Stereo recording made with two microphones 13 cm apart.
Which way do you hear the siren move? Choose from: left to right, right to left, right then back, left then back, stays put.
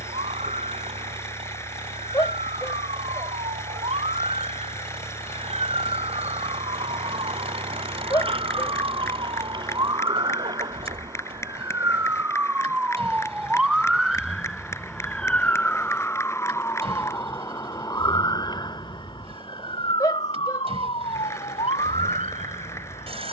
right to left.